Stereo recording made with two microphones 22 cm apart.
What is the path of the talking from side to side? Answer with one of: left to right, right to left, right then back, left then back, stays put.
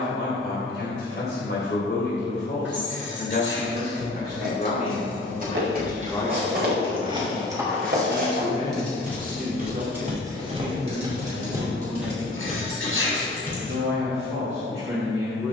left to right.